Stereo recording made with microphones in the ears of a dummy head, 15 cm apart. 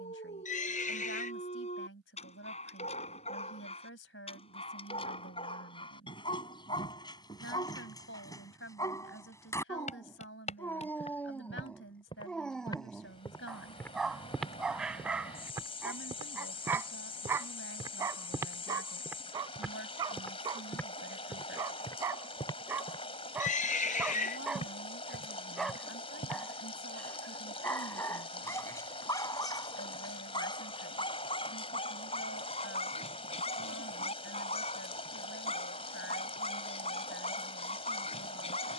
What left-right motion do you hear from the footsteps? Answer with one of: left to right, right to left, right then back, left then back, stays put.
right then back.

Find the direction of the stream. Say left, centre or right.
left.